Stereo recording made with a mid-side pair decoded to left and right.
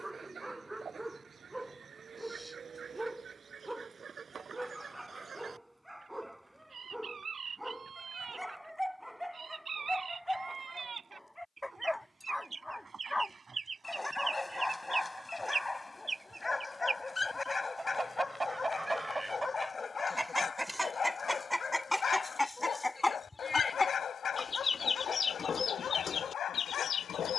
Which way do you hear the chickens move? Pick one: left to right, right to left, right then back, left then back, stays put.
right to left.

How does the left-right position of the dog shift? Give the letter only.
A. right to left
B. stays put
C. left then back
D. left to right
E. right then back
A.